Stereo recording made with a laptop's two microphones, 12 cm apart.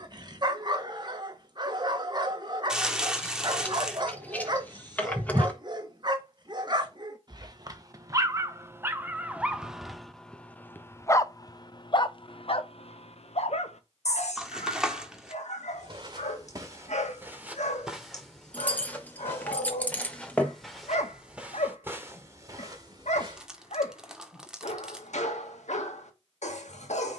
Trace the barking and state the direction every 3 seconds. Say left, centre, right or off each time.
right, right, right, centre, left, left, left, left, left.